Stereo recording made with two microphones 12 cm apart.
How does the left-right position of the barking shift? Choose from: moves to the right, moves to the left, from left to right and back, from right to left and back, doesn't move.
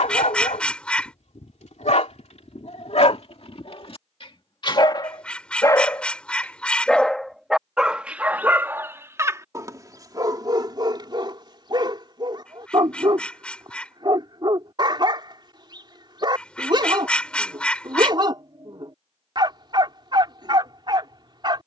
moves to the right.